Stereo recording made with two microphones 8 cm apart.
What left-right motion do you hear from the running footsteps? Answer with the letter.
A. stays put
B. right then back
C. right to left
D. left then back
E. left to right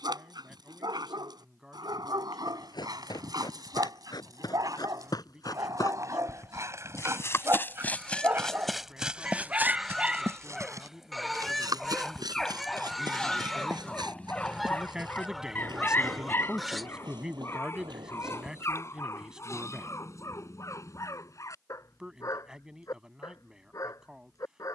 E.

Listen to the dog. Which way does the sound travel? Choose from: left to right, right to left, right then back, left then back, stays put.
right to left.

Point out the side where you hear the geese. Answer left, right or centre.
centre.